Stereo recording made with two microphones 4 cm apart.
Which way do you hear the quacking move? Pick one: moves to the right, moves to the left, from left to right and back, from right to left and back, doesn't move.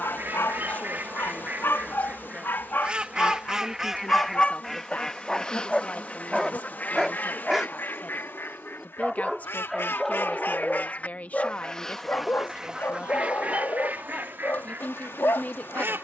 from right to left and back.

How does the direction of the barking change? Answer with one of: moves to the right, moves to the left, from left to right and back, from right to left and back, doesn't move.
from left to right and back.